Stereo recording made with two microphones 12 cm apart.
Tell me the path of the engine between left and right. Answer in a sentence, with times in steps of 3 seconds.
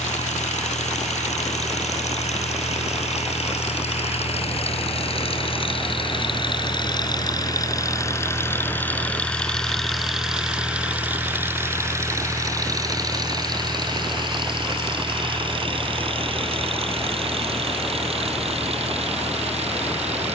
In this clip you hear the engine on the left from 0 s, in the centre from 9 s and on the right from 12 s.